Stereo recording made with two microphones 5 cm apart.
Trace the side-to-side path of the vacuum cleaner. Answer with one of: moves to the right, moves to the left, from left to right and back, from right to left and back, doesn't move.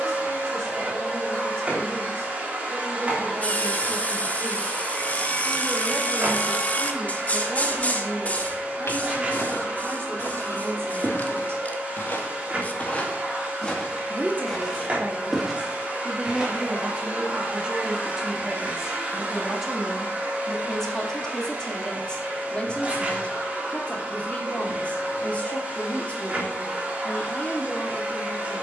doesn't move.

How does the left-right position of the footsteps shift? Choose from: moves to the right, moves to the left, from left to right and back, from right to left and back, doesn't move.
moves to the right.